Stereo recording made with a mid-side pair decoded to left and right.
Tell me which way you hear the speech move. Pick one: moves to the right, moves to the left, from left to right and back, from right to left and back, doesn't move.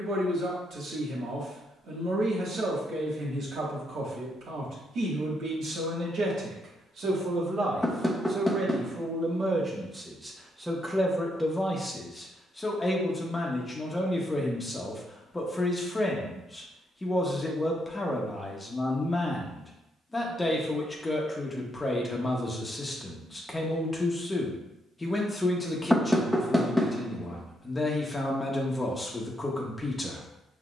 moves to the left.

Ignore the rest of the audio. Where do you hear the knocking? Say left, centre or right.
centre.